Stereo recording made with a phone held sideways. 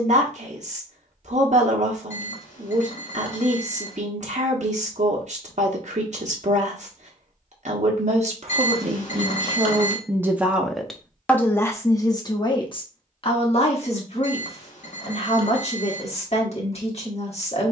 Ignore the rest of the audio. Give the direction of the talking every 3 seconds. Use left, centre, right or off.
right, right, right, centre, left, left.